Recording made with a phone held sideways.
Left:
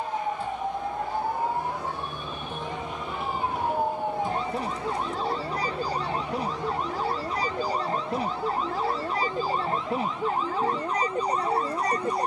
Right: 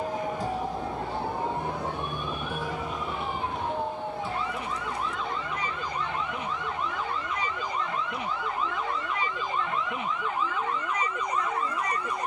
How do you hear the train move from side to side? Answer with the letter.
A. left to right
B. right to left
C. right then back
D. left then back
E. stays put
B.